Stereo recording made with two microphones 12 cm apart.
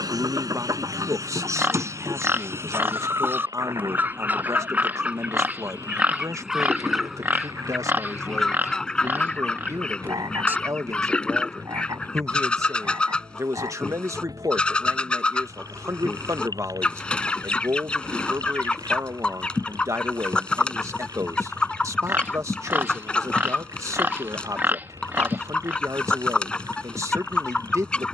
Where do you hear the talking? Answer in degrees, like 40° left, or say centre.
30° right.